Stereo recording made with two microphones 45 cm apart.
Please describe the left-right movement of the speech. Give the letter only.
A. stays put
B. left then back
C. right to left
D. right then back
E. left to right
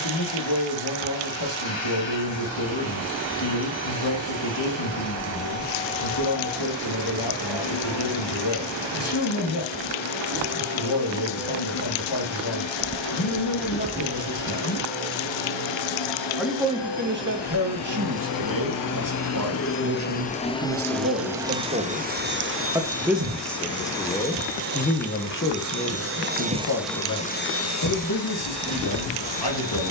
D.